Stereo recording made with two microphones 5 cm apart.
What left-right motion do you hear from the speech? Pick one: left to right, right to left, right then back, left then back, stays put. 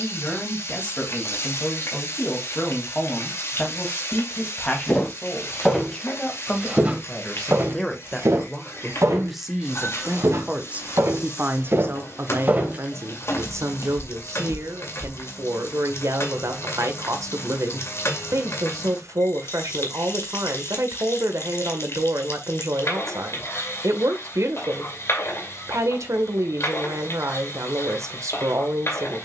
left to right.